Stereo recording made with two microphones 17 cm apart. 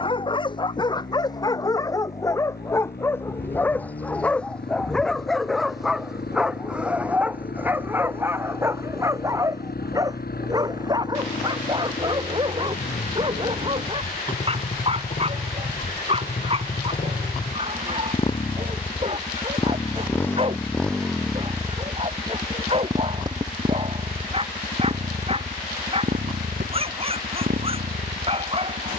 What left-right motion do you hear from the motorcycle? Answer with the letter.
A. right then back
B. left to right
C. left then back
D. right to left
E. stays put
B.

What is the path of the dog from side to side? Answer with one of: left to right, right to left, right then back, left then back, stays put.
left to right.